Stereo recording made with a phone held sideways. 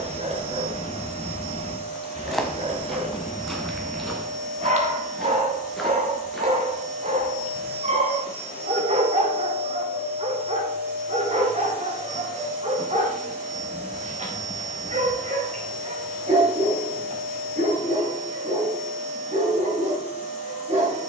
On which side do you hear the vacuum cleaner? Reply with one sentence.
In this clip you hear the vacuum cleaner on the right.